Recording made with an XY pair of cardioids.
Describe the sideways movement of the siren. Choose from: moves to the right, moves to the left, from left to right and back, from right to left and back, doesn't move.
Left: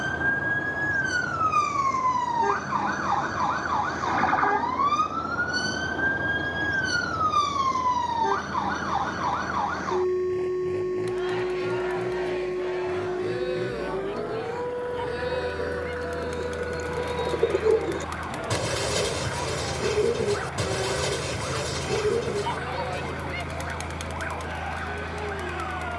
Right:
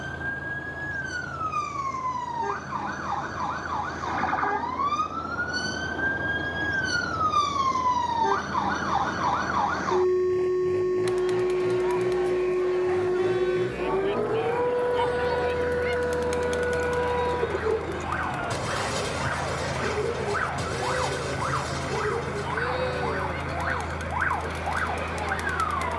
moves to the right.